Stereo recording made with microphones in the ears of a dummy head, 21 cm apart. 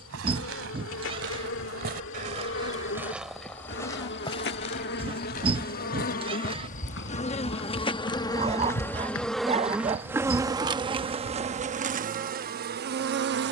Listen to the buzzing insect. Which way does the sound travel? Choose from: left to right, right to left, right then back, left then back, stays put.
left to right.